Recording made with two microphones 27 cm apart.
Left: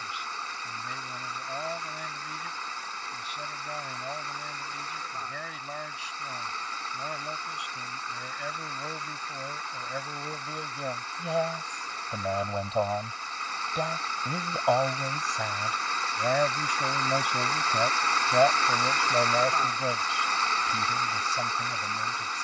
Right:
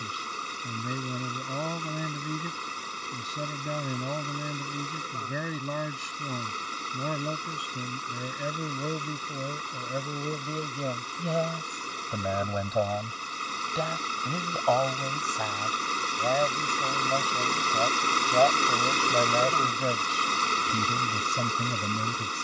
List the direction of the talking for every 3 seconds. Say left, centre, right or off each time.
right, right, right, right, centre, centre, centre, right.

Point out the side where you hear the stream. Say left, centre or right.
right.